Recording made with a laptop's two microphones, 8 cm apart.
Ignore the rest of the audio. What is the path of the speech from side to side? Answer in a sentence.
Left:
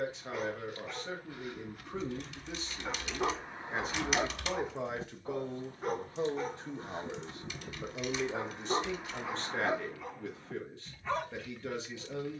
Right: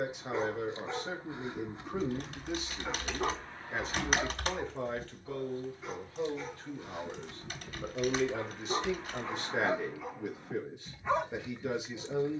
You can hear the speech move from right to left and back again.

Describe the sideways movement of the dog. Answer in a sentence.
You can hear the dog go left and come back.